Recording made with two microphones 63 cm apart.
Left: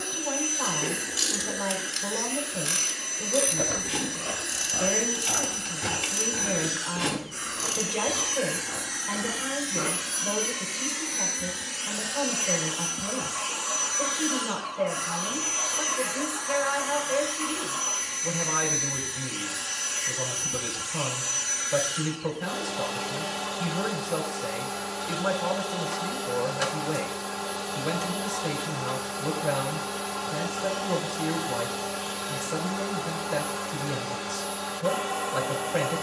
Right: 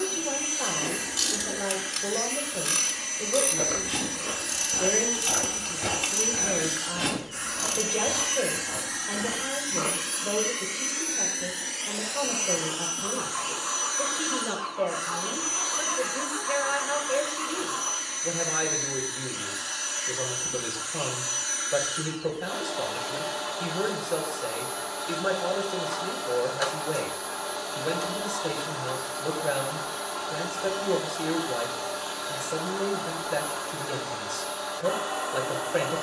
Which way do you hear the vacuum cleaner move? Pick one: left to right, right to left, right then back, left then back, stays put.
right to left.